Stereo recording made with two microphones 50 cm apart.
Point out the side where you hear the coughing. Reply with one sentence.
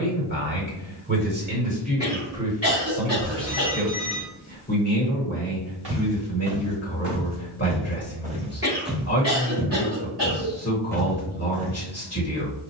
In this clip you hear the coughing on the right.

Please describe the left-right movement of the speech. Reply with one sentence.
You can hear the speech travel towards the left.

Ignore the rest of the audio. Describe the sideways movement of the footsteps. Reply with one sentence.
You can hear the footsteps go left and come back.